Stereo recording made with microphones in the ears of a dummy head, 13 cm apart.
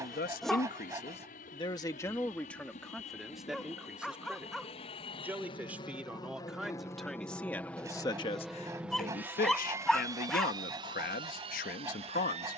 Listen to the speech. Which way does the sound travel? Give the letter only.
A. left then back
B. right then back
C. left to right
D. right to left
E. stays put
B.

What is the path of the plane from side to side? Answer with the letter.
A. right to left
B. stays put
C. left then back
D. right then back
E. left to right
E.